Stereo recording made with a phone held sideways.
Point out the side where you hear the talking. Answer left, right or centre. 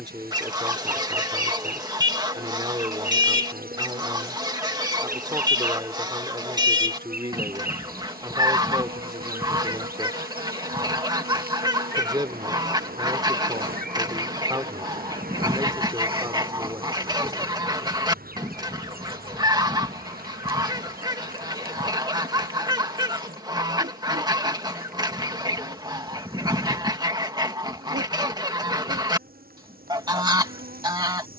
right.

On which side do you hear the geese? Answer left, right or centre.
right.